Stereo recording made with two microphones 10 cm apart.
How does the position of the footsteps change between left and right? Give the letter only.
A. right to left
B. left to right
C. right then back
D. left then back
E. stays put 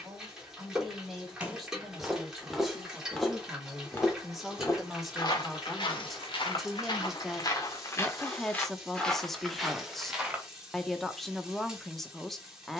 D.